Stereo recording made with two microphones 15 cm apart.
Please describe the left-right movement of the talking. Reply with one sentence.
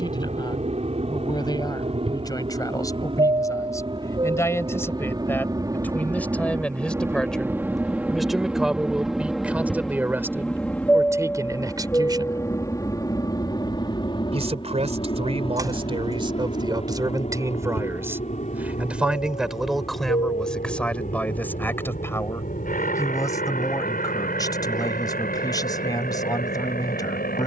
You can hear the talking go right and come back.